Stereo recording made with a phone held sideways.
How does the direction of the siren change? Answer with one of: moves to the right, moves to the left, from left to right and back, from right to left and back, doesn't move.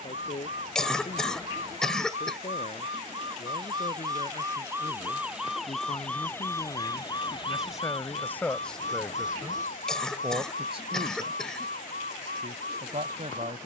moves to the left.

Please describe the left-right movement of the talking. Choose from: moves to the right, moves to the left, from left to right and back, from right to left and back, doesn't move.
moves to the right.